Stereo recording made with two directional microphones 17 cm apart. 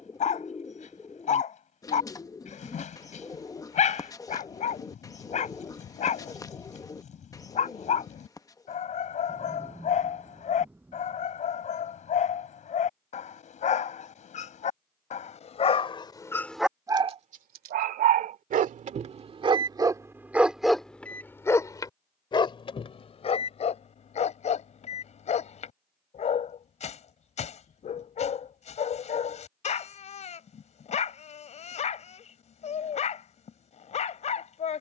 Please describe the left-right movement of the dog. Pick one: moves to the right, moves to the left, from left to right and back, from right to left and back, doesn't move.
from left to right and back.